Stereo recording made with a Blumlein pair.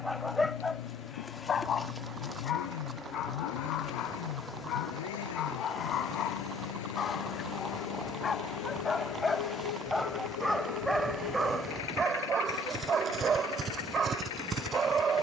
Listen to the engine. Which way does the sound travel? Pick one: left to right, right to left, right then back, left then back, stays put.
stays put.